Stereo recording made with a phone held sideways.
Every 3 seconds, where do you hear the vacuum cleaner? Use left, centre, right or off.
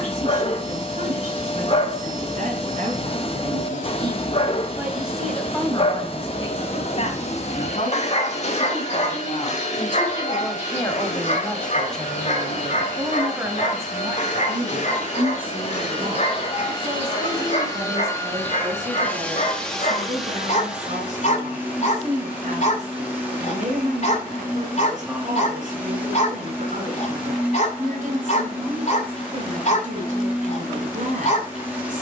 left, left, left, left, left, left, centre, centre, centre, centre, centre.